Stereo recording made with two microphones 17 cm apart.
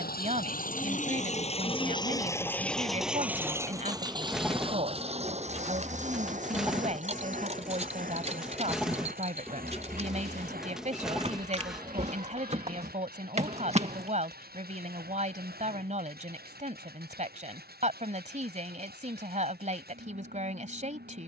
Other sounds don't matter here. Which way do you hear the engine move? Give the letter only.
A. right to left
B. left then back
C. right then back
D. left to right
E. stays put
D.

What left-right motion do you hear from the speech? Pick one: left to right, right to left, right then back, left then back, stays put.
stays put.